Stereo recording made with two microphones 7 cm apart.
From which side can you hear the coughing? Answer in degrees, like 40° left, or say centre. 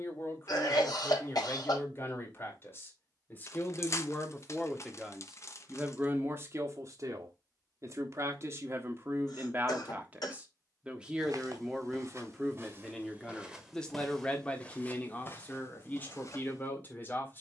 60° left.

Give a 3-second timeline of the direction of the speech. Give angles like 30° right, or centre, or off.
30° left, 10° left, 40° right, 20° right, 10° left, 20° left.